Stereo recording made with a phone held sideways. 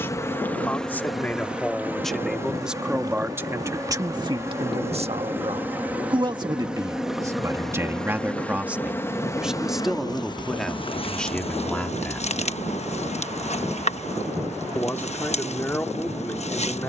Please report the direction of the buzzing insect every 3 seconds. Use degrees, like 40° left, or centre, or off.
centre, 20° right, centre, 30° left, 50° left, 50° left.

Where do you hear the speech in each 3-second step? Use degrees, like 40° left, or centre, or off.
10° left, 30° right, 20° right, centre, 10° left, 10° left.